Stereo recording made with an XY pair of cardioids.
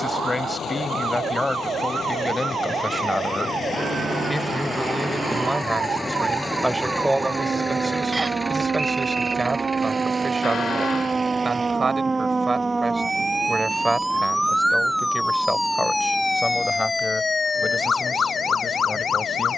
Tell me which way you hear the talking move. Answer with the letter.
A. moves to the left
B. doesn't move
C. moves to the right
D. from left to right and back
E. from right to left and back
D.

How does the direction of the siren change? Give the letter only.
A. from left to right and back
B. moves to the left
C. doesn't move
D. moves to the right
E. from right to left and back
B.